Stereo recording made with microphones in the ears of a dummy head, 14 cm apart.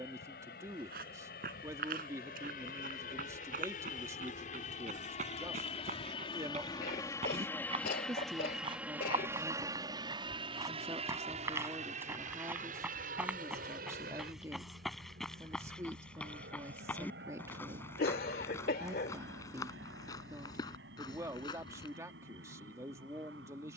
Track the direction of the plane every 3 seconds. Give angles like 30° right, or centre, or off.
70° left, 50° left, 10° left, 30° right, 50° right, 60° right, 70° right, 70° right.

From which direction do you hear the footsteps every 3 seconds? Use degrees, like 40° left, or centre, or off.
60° right, 50° right, 40° right, 20° right, 10° right, 10° left, 20° left, 30° left.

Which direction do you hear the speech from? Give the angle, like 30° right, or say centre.
20° right.